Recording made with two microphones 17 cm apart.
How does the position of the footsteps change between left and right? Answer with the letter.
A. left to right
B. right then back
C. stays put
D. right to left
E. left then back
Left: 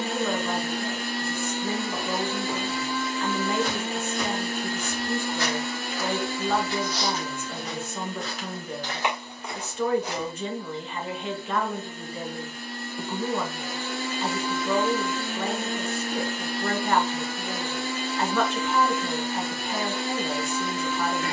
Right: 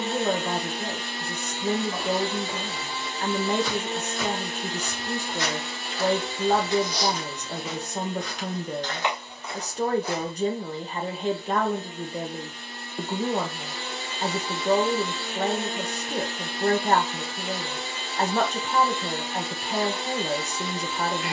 B.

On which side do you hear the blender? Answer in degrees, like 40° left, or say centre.
50° left.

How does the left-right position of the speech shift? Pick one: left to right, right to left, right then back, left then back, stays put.
stays put.